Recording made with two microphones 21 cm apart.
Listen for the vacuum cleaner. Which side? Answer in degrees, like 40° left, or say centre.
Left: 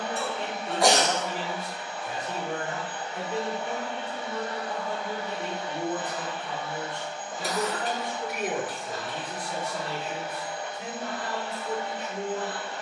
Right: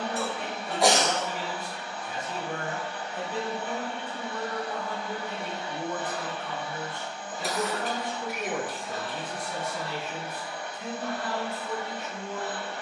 20° left.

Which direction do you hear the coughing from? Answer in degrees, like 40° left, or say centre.
centre.